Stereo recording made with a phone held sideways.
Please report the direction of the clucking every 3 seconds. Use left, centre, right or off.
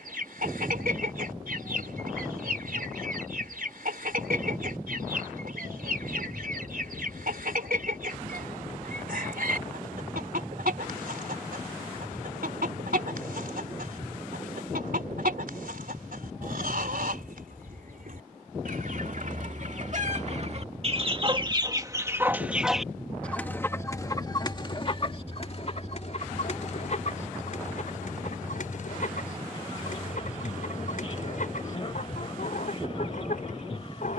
right, right, right, right, right, right, right, centre, left, left, left, left.